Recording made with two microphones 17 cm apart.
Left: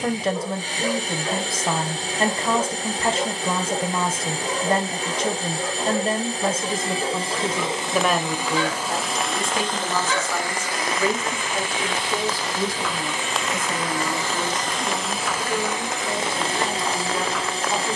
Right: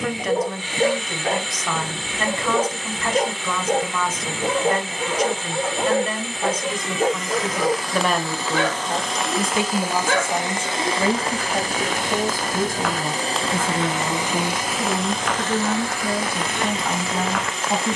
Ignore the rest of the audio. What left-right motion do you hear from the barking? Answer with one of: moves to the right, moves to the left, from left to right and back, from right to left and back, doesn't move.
doesn't move.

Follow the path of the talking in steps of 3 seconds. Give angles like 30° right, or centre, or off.
30° left, 30° left, 10° left, 30° right, 50° right, 60° right.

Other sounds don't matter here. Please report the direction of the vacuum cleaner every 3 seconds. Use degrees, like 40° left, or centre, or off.
40° left, 40° left, 30° left, 20° right, 30° right, 20° left.